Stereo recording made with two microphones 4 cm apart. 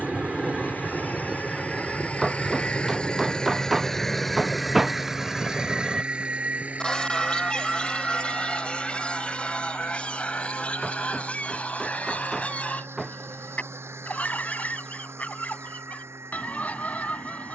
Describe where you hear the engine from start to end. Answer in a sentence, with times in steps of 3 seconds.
In this clip you hear the engine on the left from 0 s, in the centre from 3 s and on the right from 6 s.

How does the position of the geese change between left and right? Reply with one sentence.
You can hear the geese move to the left.